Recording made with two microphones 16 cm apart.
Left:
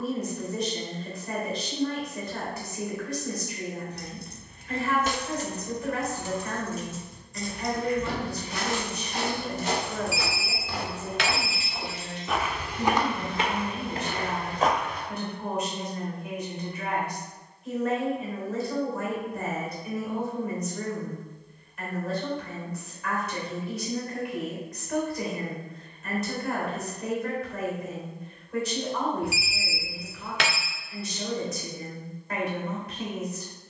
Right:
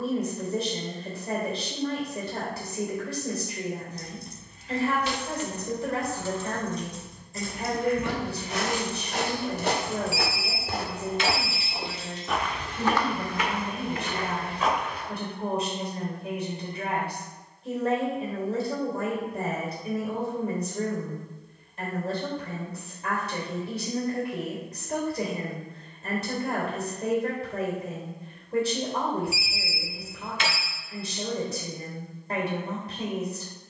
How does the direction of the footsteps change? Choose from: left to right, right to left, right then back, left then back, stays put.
right to left.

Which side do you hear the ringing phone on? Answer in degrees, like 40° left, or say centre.
70° left.